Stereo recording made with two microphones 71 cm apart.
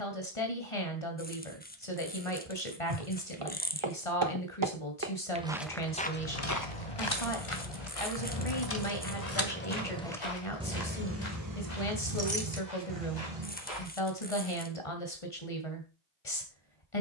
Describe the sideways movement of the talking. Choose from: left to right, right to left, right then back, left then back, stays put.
stays put.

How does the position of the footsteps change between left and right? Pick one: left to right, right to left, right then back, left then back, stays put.
right to left.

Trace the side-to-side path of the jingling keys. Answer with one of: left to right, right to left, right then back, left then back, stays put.
left to right.